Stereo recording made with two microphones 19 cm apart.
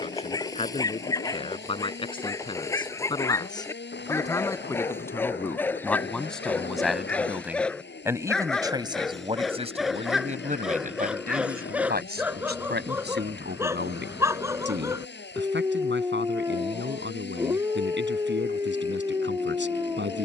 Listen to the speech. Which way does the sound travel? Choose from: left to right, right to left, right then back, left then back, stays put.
left to right.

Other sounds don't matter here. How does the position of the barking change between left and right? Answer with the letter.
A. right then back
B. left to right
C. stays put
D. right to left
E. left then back
B.